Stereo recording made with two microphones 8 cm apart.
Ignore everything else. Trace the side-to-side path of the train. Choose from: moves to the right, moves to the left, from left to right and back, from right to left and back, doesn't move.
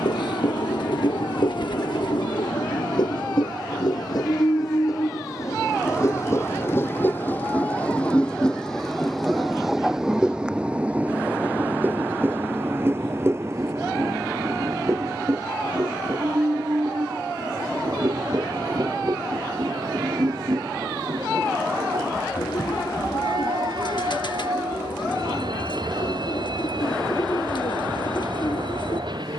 moves to the right.